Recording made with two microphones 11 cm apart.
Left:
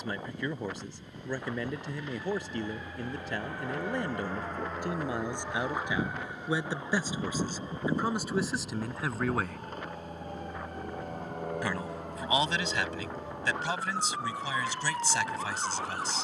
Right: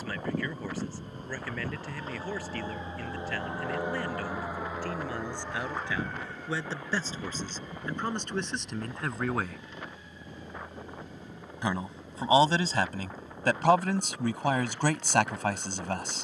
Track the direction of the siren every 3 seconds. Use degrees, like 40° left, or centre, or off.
40° right, 10° right, 30° left, 50° left, 60° left, 70° left.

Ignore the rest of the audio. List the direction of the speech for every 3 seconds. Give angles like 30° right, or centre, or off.
20° left, 20° left, 10° left, 10° right, 50° right, 60° right.